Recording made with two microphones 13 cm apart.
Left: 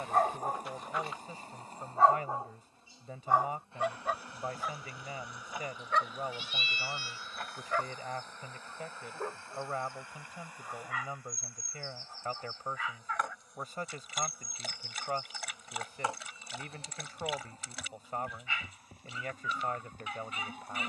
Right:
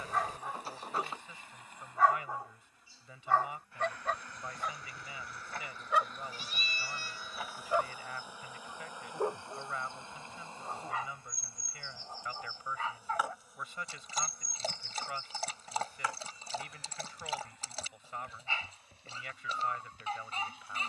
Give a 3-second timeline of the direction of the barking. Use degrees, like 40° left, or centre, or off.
40° left, centre, 20° right, 30° right, 30° right, 30° right, 30° right.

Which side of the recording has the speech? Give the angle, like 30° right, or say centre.
40° left.